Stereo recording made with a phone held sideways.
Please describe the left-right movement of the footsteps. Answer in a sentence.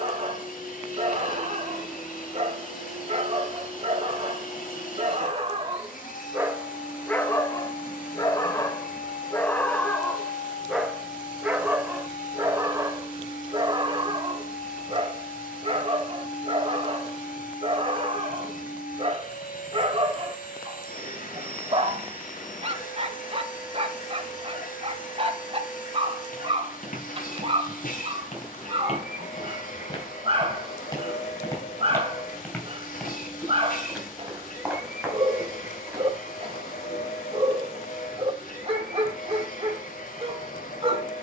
You can hear the footsteps travel towards the right.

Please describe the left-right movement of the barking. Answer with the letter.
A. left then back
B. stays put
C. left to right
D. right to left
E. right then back
A.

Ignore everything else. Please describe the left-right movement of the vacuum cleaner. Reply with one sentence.
In this clip you hear the vacuum cleaner stay in one place.